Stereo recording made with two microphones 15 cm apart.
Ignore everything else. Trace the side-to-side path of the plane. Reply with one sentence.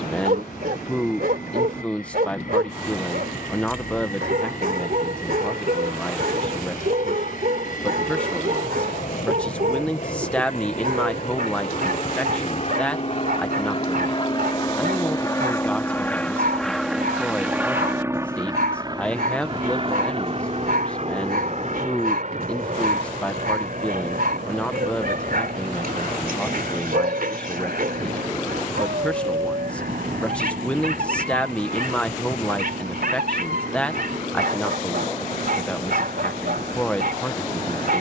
In this clip you hear the plane move from left to right.